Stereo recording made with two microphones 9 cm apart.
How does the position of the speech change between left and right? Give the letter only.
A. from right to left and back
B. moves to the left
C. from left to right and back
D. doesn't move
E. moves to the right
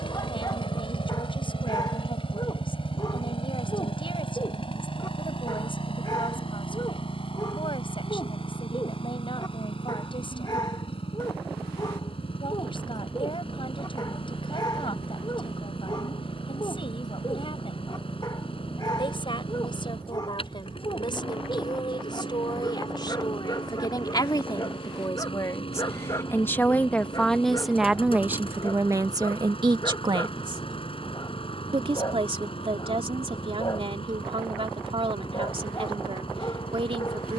E.